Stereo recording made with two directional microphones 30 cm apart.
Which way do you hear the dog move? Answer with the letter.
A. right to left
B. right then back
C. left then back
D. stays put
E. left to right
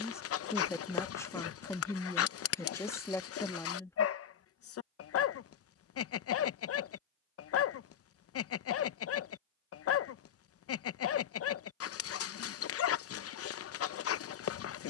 D.